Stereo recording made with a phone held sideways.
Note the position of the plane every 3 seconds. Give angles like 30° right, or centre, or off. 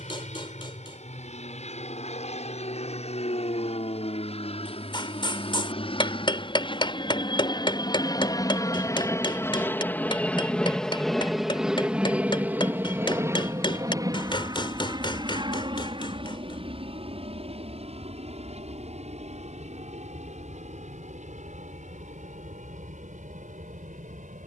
60° left, 50° left, 40° left, 10° left, 20° right, 40° right, 50° right, 60° right.